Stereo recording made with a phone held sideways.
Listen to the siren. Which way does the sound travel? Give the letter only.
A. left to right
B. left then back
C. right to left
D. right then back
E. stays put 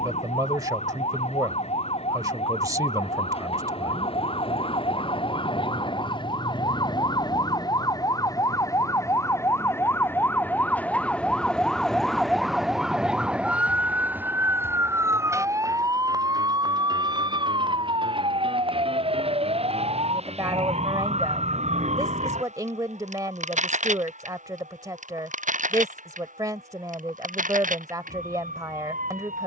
A.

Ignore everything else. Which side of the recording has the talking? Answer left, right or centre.
right.